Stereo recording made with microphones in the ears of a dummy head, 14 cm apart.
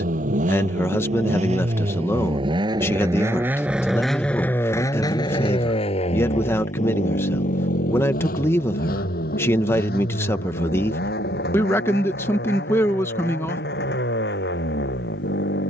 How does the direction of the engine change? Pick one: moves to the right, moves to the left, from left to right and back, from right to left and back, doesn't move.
moves to the left.